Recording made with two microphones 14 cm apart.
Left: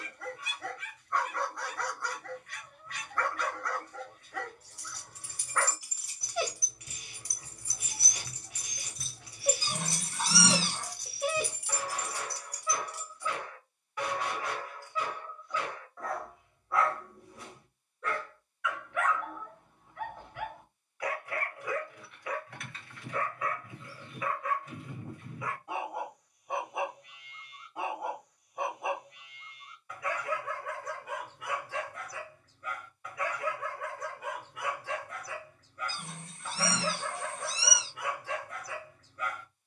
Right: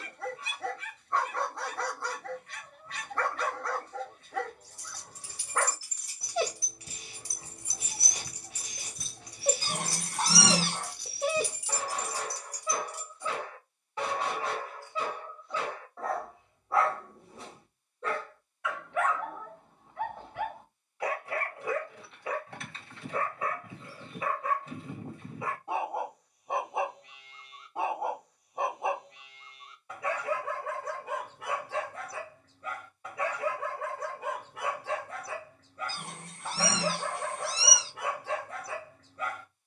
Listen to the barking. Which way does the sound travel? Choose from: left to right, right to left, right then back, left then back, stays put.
stays put.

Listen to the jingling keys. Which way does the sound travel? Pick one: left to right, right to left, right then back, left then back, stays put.
right then back.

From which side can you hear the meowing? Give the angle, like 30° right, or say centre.
60° right.